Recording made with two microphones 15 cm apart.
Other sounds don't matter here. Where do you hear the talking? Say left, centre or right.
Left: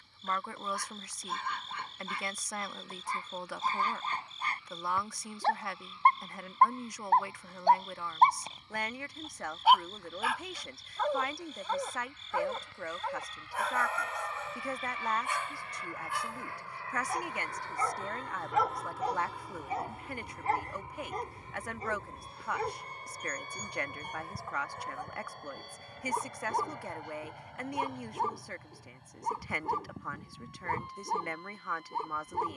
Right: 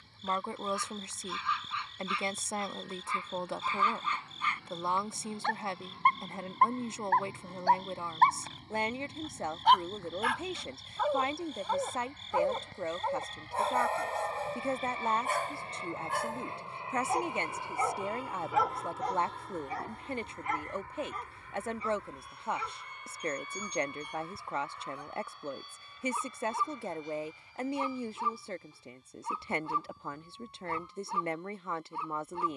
right.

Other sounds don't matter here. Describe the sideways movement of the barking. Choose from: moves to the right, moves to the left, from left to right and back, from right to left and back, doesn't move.
from left to right and back.